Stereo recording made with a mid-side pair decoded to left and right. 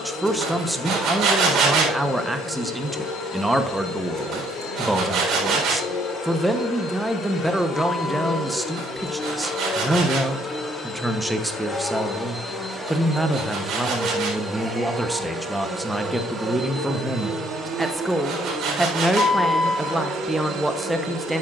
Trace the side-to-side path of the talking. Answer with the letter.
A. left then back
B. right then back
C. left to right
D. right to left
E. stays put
E.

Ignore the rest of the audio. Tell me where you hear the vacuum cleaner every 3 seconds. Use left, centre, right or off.
left, left, left, left, centre, right, right.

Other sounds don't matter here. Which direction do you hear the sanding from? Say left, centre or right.
right.